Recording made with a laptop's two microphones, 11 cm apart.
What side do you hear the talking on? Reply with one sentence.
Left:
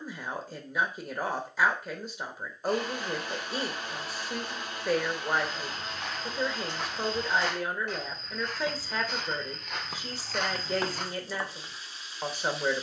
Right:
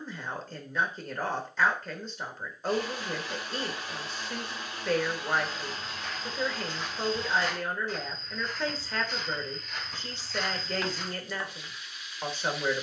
You can hear the talking in the centre.